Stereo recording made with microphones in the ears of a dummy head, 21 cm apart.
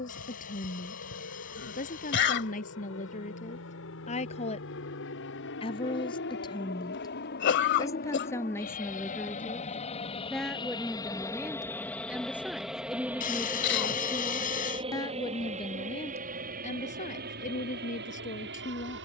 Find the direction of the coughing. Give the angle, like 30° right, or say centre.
50° left.